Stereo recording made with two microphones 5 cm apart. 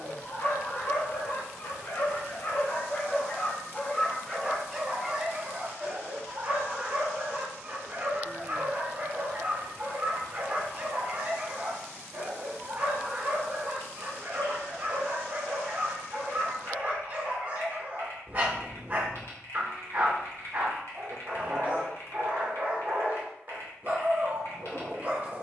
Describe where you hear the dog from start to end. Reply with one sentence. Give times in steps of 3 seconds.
You can hear the dog on the left from 0 s, in the centre from 3 s and on the right from 6 s.